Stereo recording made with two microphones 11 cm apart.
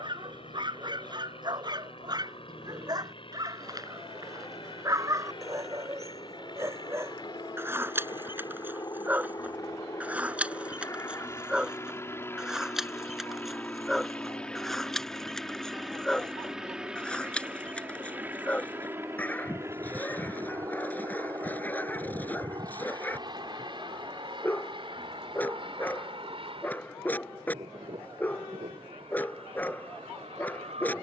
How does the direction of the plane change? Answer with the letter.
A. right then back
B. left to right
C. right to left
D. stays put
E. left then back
B.